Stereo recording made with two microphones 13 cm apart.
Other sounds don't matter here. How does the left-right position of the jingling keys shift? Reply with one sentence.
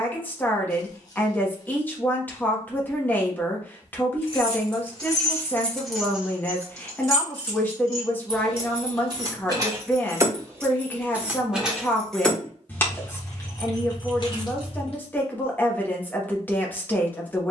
You can hear the jingling keys move from left to right and back again.